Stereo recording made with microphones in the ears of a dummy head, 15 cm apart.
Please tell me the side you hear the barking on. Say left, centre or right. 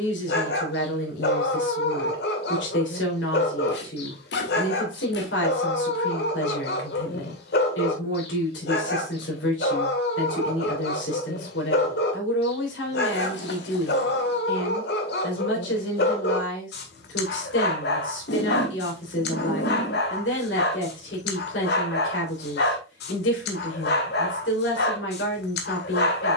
left.